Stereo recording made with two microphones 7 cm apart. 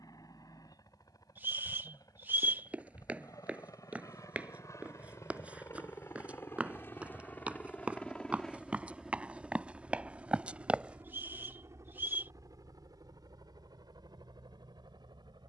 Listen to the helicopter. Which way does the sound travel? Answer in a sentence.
You can hear the helicopter move to the right.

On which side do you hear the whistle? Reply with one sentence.
You can hear the whistle on the right.